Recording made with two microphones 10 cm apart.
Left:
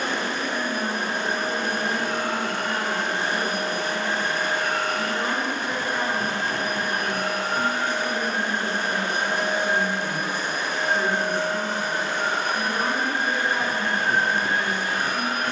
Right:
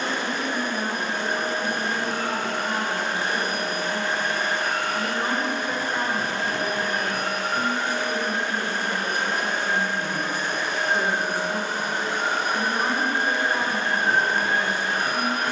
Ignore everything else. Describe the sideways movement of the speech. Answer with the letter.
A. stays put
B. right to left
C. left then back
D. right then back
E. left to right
A.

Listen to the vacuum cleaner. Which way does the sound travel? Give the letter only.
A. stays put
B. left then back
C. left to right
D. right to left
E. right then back
C.